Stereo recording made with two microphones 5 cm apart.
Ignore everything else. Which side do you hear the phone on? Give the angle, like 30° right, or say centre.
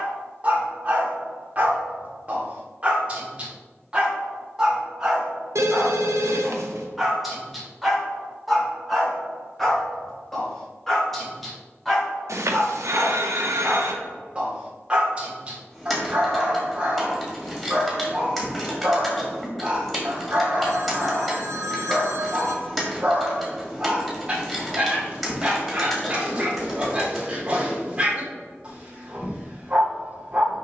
80° right.